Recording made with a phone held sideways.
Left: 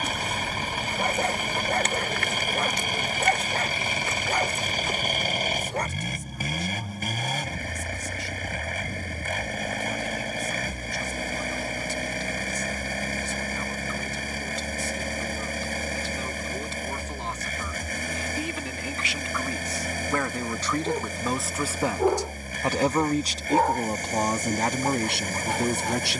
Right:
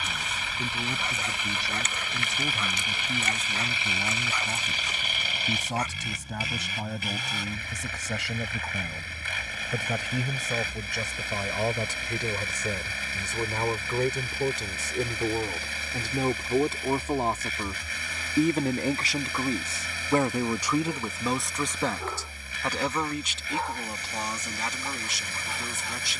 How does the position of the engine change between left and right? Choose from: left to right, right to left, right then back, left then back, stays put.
stays put.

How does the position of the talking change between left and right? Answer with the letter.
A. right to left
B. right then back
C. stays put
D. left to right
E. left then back
A.